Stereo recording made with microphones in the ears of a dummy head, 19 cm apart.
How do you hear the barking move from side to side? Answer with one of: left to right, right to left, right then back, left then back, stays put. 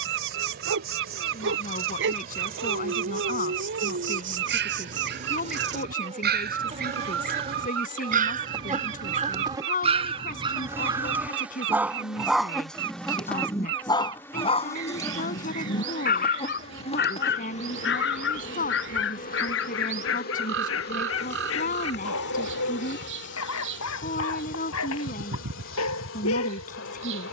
right to left.